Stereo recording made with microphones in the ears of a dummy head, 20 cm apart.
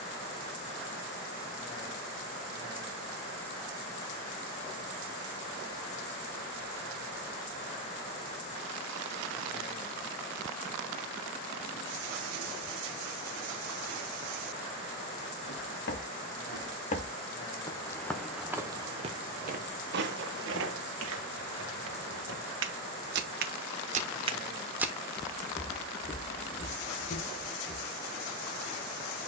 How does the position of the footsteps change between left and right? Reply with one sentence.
In this clip you hear the footsteps move from left to right and back again.